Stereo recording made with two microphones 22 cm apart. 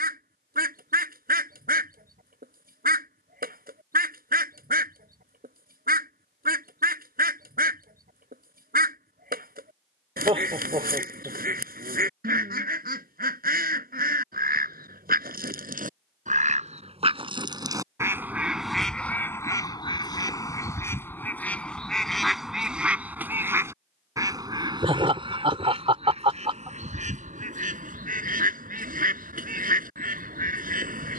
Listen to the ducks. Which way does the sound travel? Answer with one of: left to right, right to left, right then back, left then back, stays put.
left then back.